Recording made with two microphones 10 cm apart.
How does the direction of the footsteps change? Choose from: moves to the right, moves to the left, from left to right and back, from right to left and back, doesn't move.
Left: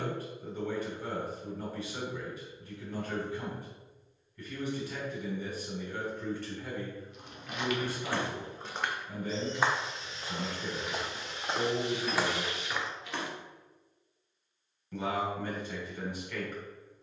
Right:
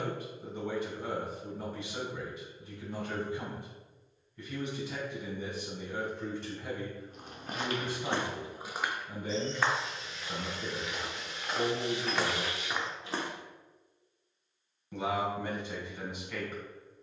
from right to left and back.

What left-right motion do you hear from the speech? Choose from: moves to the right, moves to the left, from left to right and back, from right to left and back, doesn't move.
doesn't move.